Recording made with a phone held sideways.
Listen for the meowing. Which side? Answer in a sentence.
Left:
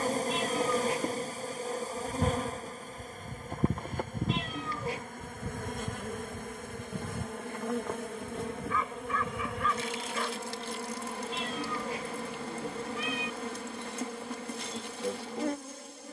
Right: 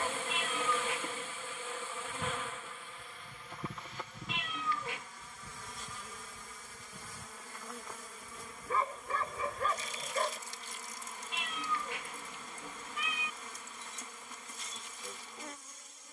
You can hear the meowing on the left.